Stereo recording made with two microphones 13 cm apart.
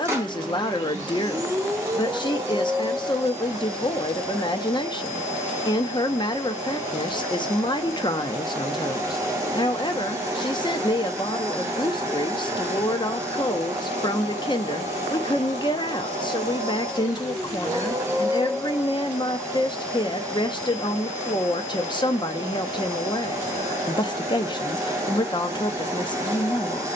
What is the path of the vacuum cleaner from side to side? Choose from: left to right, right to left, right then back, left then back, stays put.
stays put.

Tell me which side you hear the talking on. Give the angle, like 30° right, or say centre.
40° left.